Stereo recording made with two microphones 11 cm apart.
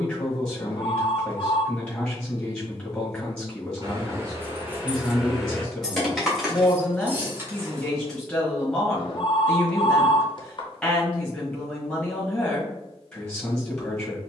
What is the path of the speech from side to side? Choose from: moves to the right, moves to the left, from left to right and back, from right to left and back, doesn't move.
doesn't move.